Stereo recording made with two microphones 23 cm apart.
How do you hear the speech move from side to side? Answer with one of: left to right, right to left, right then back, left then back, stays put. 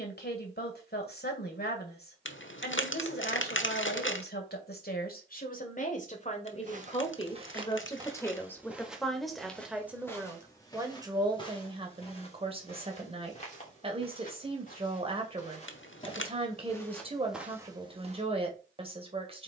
left to right.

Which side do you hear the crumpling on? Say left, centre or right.
left.